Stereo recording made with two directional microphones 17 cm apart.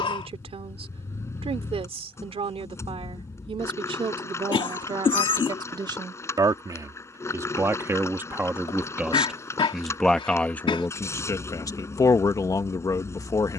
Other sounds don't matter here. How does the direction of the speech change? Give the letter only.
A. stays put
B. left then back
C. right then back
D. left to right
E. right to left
E.